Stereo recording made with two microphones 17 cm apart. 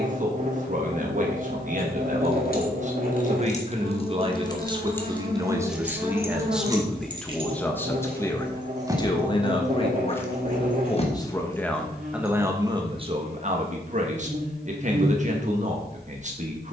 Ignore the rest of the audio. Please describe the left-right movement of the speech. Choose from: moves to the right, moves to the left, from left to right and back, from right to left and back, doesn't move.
from right to left and back.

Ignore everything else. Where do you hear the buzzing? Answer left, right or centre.
right.